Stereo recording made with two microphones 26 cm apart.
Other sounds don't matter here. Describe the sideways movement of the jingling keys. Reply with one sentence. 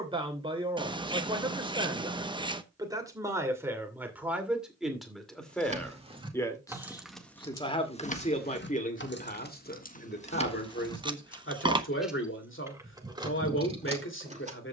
In this clip you hear the jingling keys move from right to left and back again.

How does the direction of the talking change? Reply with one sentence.
You can hear the talking move to the left.